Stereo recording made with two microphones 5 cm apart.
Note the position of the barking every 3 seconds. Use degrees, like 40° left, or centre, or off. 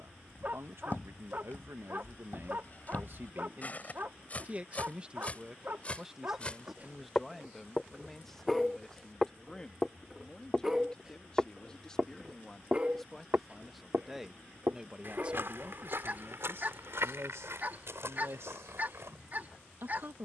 40° right, 40° right, 20° right, 10° right, 20° right, 40° right, 40° right.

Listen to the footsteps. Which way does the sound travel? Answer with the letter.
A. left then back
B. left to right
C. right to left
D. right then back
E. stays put
B.